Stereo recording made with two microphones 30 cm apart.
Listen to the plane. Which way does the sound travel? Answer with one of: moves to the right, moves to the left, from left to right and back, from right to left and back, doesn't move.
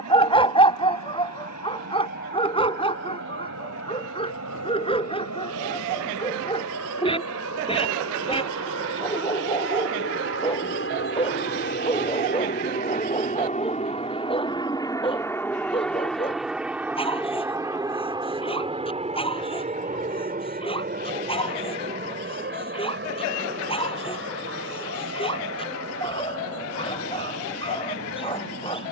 moves to the right.